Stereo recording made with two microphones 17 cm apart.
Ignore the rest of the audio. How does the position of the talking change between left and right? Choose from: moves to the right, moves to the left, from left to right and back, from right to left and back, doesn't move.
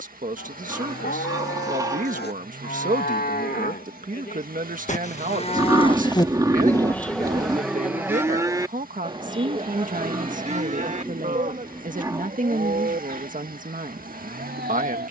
doesn't move.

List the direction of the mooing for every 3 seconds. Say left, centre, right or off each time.
left, left, centre, right, right.